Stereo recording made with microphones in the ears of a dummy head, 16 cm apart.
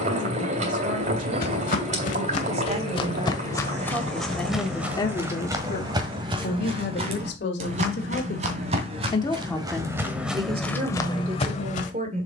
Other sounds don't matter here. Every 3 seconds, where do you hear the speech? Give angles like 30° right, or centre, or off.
40° right, 10° left, 60° left, 20° right.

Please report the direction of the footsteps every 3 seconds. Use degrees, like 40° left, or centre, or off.
50° left, centre, 40° right, centre.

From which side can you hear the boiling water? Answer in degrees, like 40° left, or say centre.
40° right.